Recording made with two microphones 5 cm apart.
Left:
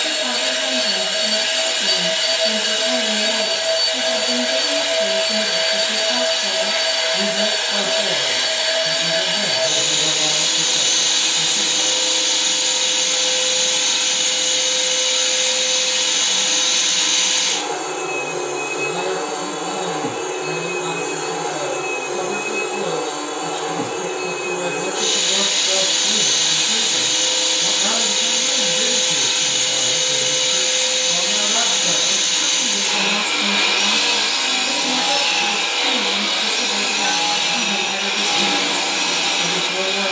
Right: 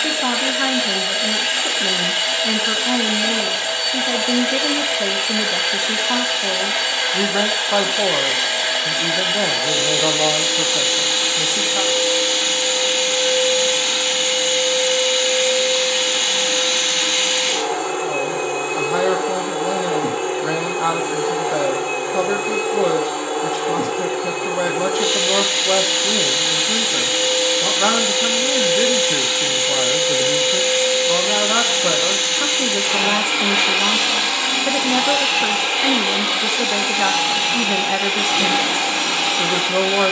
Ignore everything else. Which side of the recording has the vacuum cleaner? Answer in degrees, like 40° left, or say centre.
20° right.